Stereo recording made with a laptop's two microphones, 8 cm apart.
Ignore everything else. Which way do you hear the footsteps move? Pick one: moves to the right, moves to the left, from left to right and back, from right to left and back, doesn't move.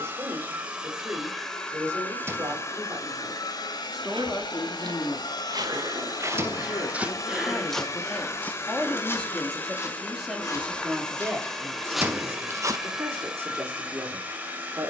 from right to left and back.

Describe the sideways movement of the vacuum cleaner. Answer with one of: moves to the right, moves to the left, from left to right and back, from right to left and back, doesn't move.
from right to left and back.